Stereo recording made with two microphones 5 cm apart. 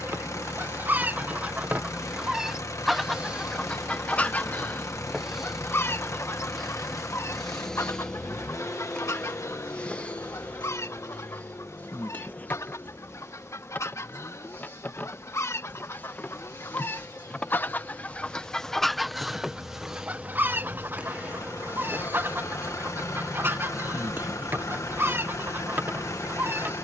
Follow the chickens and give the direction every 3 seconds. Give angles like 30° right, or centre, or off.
30° right, 30° left, 60° left, 70° left, 70° left, 50° left, 10° right, 50° right, 50° right.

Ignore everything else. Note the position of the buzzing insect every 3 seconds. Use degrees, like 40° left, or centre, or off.
30° right, 10° right, 10° left, 30° left, 40° left, 30° left, centre, 30° right, 40° right.